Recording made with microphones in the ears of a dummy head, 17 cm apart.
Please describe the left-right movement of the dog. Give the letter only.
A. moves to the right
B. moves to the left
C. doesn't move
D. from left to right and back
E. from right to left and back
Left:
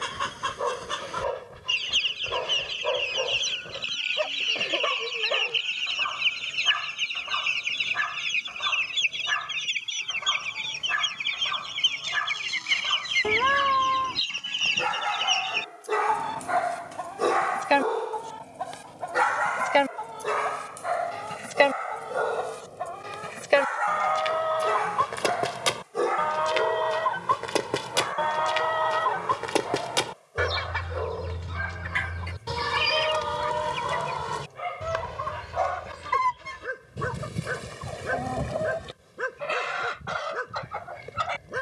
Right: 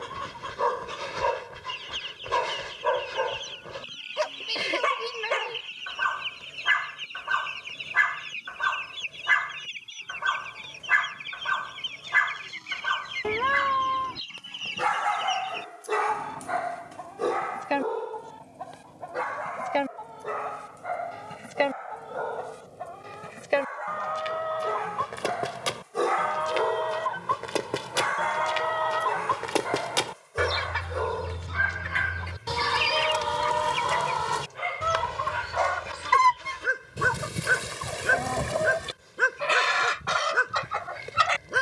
E.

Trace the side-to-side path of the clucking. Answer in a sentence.
In this clip you hear the clucking go from the left side to the right.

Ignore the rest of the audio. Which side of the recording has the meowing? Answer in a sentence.
You can hear the meowing in the centre.